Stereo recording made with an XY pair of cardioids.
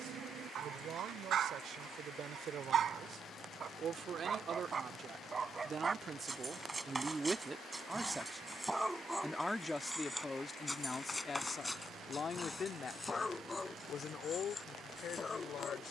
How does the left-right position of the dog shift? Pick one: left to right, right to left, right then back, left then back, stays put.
right to left.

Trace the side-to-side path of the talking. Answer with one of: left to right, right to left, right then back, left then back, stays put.
right to left.